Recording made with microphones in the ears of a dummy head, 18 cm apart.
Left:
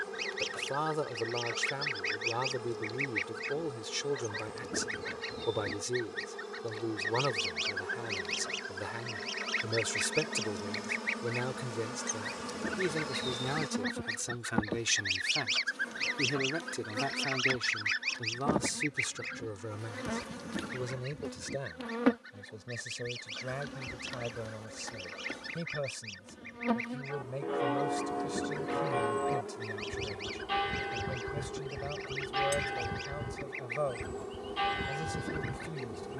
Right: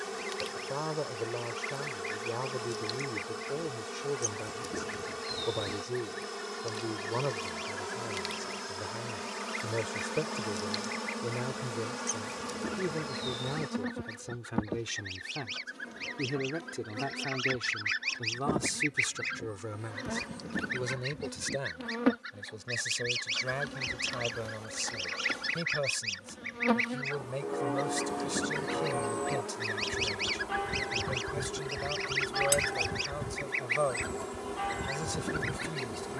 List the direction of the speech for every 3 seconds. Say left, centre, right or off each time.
left, left, left, left, left, left, centre, right, right, right, right, right.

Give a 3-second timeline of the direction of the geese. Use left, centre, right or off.
left, left, left, left, left, left, right, right, right, right, right, right.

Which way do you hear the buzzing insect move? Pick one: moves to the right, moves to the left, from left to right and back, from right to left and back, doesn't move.
from right to left and back.